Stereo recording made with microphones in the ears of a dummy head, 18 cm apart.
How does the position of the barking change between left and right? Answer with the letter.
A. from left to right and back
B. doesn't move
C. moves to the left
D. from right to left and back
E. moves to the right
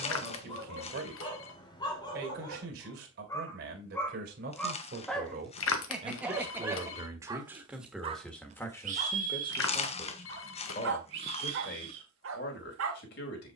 E.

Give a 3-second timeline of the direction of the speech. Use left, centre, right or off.
right, right, centre, left, left.